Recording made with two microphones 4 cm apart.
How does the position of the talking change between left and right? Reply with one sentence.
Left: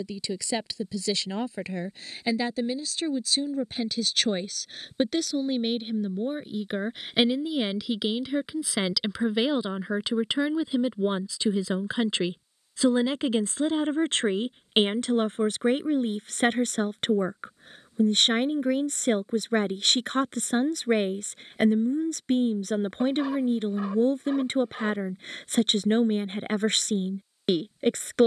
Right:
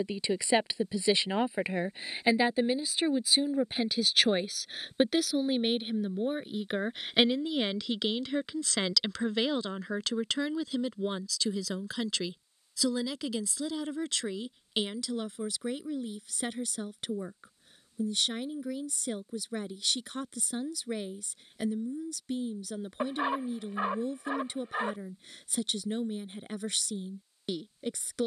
In this clip you hear the talking travel towards the left.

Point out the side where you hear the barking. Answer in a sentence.
You can hear the barking on the right.